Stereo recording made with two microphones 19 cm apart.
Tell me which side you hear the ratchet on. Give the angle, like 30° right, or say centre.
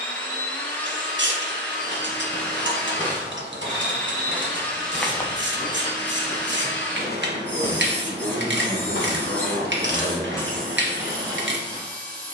80° right.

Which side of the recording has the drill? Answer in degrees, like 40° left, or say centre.
10° left.